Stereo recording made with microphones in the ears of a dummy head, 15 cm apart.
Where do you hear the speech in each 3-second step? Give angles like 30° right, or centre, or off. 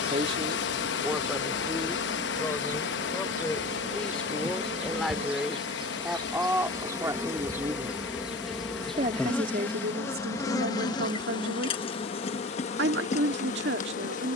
centre, centre, 20° right, 60° right, 70° right.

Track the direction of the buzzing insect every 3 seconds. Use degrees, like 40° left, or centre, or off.
50° right, 40° right, 10° right, 20° left, 40° left.